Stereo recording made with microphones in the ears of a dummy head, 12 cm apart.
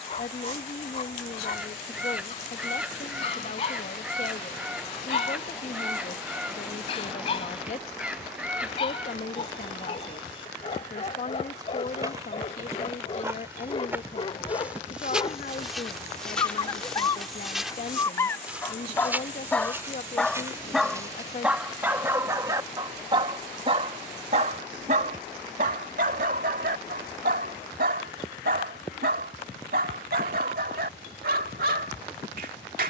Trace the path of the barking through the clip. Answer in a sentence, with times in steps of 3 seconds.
In this clip you hear the barking on the left from 0 s, in the centre from 18 s and on the right from 21 s.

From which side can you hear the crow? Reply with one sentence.
You can hear the crow in the centre.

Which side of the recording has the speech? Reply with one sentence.
You can hear the speech on the left.